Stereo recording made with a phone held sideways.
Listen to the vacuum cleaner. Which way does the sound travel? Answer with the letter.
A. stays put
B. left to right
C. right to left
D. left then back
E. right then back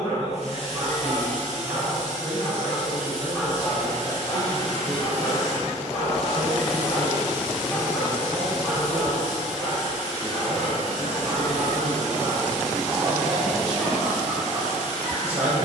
A.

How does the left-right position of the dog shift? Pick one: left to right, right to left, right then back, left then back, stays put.
left then back.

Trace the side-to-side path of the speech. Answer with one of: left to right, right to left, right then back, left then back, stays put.
stays put.